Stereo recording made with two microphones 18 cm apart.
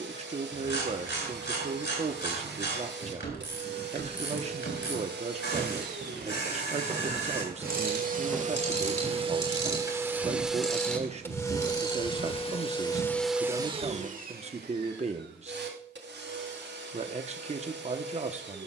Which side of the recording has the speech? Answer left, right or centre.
right.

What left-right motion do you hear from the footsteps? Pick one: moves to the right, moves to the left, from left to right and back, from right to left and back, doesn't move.
moves to the left.